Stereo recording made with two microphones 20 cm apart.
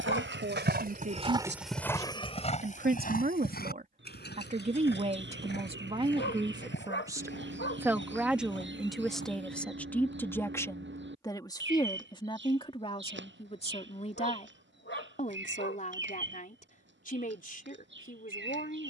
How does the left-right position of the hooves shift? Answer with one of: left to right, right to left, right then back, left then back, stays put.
right to left.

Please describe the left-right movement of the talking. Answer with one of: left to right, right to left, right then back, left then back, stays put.
right to left.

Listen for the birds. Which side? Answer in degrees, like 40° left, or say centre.
70° right.